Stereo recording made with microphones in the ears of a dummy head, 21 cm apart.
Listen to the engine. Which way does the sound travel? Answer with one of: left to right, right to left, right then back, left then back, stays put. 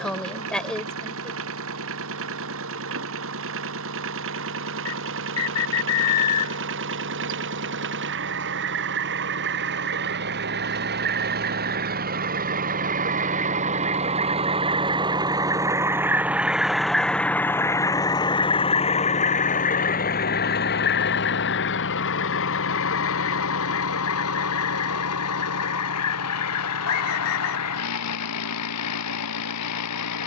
right to left.